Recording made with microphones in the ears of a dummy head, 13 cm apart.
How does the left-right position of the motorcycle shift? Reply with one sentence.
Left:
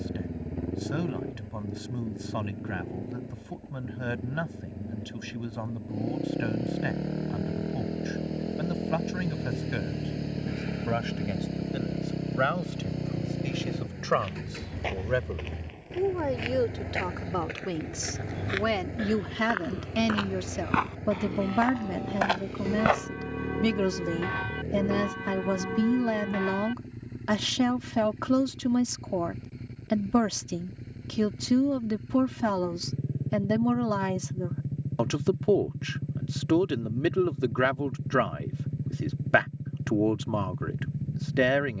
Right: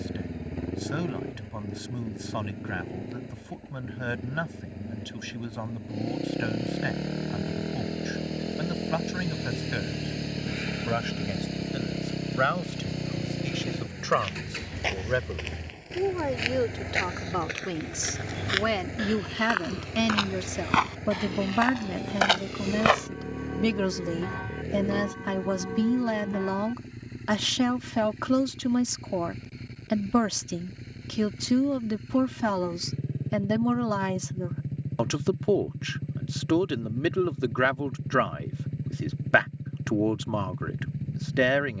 You can hear the motorcycle stay in one place.